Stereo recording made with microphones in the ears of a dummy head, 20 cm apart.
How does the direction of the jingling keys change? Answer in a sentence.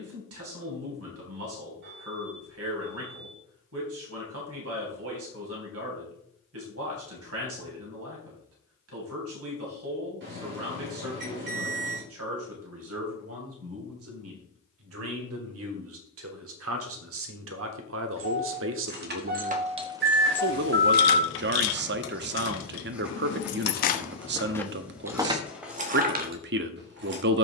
You can hear the jingling keys move from right to left and back again.